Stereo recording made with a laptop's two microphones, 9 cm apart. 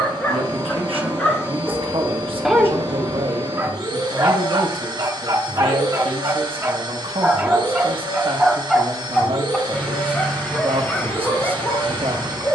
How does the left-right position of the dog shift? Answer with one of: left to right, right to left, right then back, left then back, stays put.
right then back.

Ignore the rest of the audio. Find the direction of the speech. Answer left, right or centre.
right.